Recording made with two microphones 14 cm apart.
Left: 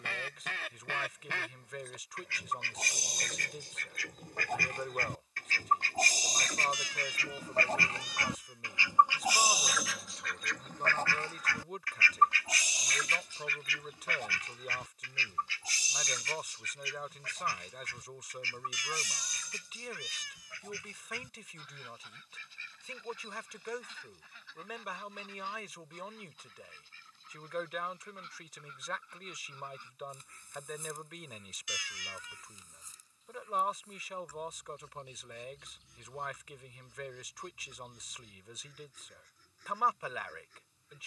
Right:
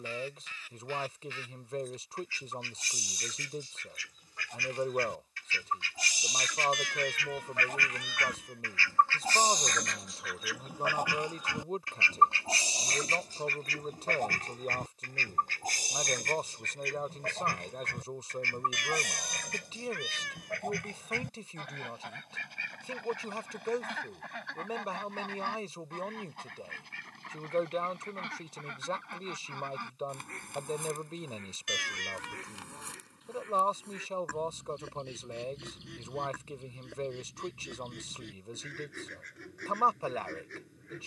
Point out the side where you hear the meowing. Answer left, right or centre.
right.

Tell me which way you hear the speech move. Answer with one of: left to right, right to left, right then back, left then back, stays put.
stays put.